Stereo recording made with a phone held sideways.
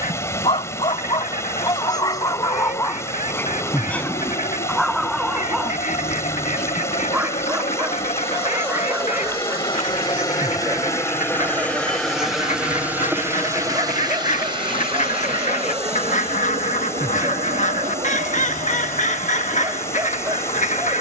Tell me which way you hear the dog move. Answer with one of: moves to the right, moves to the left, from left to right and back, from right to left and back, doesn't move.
moves to the right.